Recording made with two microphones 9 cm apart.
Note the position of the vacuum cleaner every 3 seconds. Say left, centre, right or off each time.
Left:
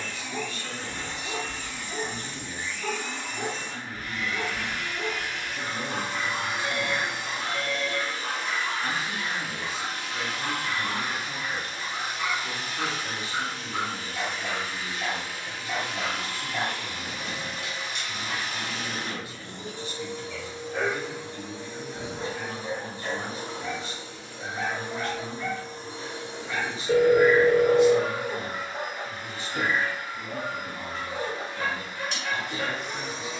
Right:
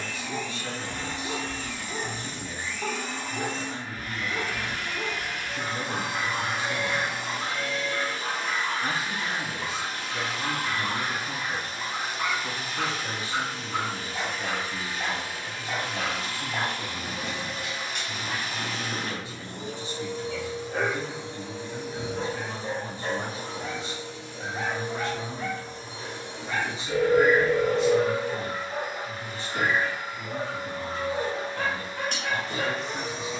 right, right, right, right, right, right, right, centre, left, centre, right.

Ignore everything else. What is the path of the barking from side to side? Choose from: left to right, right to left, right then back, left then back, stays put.
stays put.